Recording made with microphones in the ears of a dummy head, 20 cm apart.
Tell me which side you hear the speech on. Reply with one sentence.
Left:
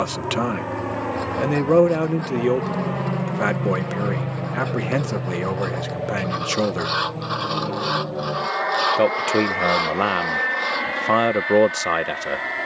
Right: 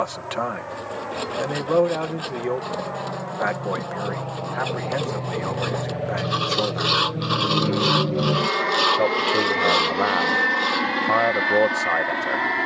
In this clip you hear the speech on the left.